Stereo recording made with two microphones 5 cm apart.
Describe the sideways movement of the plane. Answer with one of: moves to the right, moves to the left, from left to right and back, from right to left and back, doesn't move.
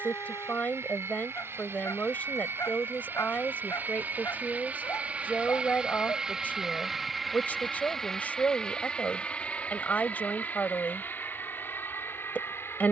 moves to the left.